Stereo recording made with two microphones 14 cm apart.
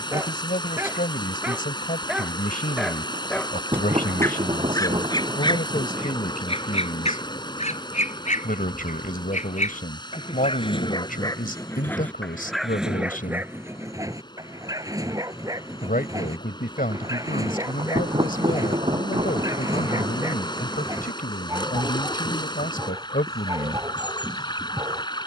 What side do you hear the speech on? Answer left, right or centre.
left.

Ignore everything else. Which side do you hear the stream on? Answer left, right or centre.
left.